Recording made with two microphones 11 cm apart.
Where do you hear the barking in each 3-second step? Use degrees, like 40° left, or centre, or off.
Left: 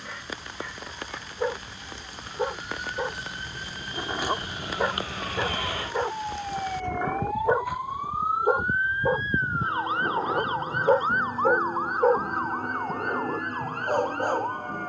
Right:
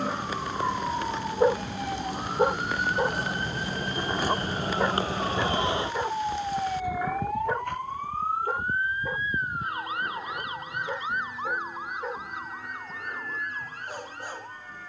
30° right, centre, 30° left, 50° left, 60° left.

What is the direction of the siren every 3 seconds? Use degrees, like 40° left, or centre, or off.
70° right, 40° right, centre, 30° left, 50° left.